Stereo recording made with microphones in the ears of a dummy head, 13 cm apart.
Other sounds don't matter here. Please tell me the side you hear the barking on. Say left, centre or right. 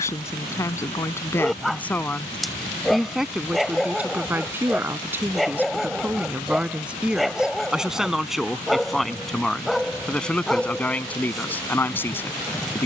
centre.